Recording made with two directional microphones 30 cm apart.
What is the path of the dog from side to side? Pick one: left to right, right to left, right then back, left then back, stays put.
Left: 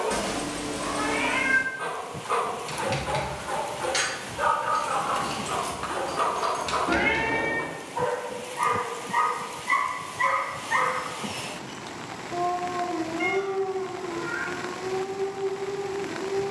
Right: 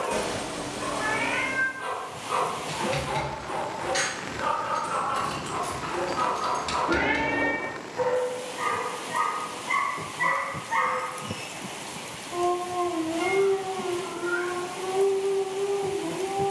left to right.